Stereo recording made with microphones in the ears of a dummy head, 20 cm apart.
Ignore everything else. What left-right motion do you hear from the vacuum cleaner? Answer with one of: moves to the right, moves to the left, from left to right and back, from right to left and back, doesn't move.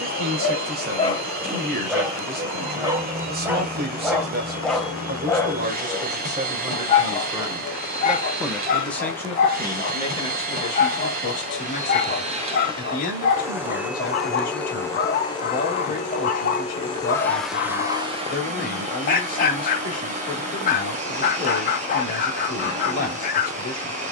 from right to left and back.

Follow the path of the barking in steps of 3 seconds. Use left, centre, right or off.
centre, centre, left, left, left, left, left, left.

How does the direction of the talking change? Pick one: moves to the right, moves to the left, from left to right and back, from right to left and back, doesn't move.
moves to the left.